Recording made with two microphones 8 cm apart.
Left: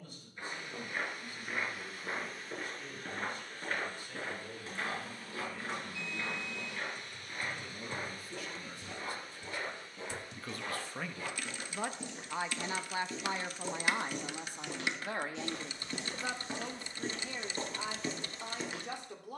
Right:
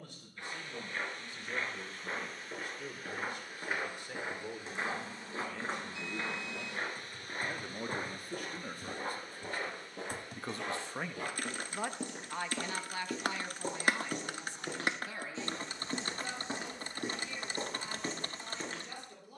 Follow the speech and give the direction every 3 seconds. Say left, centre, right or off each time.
right, right, right, right, left, left, left.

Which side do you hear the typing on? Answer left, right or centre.
right.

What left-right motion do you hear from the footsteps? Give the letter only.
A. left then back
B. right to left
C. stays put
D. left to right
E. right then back
E.